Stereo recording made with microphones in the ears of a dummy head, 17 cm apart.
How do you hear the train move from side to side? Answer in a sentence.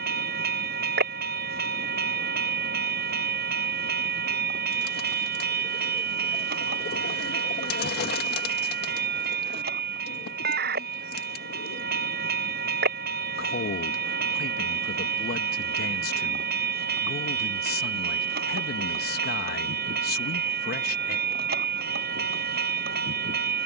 In this clip you hear the train stay put.